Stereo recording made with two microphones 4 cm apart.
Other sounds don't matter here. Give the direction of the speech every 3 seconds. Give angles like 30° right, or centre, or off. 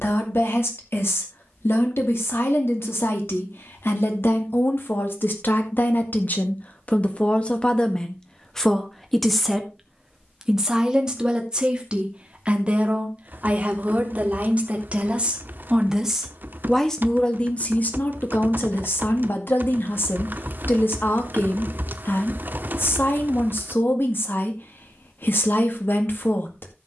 70° left, 70° left, 30° left, 10° right, 30° right, 10° left, 60° left, 60° left, 60° left.